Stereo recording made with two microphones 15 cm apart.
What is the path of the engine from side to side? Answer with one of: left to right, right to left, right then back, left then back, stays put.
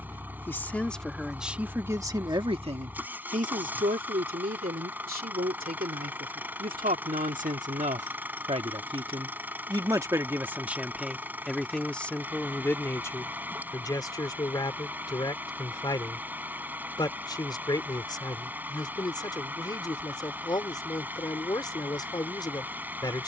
stays put.